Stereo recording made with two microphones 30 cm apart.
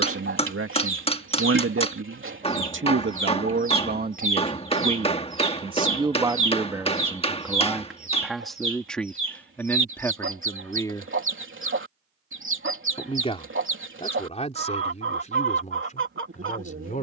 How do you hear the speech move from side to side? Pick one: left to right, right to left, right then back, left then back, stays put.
right to left.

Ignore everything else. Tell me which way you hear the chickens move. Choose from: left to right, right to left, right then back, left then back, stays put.
stays put.